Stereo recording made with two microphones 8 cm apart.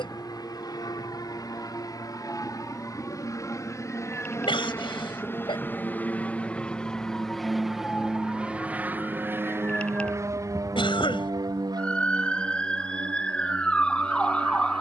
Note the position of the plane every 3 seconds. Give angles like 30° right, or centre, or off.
50° left, 40° left, centre, 40° right, 60° right.